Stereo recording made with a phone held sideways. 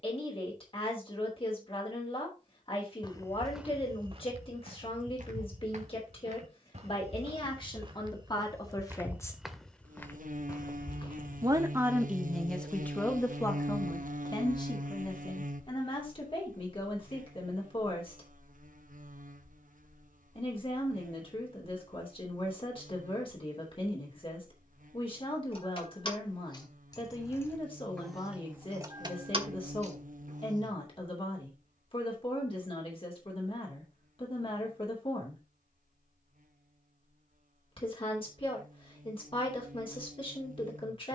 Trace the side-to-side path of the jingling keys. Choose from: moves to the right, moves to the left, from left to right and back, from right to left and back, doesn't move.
moves to the right.